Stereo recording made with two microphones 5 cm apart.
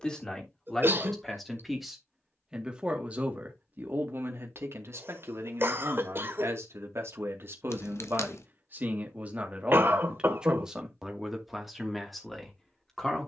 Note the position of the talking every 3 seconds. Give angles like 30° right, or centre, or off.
centre, 50° right, 50° right, 20° right, 10° left.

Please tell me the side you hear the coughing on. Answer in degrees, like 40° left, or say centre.
50° right.